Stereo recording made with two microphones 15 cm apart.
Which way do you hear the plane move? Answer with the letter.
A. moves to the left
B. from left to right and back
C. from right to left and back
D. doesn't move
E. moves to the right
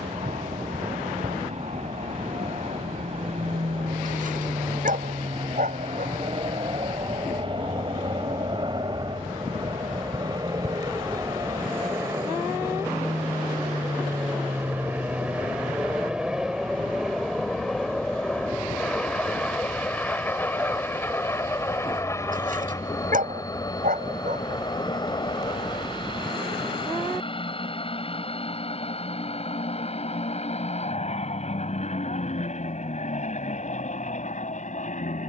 A.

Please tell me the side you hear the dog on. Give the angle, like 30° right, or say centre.
60° right.